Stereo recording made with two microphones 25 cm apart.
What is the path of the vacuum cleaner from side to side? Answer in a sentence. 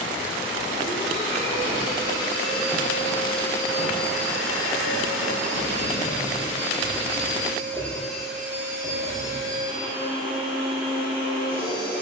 You can hear the vacuum cleaner go left and come back.